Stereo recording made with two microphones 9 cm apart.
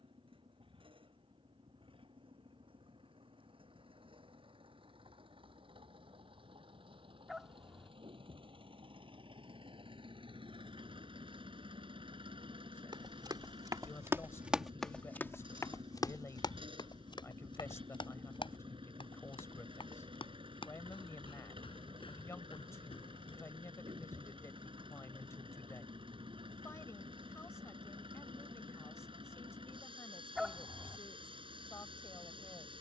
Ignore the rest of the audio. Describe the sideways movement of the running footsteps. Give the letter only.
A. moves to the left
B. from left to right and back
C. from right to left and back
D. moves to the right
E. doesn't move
A.